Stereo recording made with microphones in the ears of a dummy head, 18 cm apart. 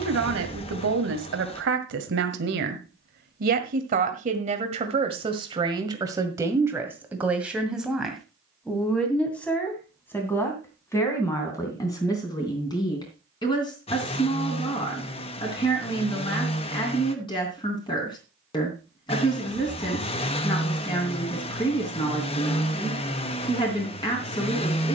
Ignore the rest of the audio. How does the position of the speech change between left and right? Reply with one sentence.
In this clip you hear the speech go from the right side to the left.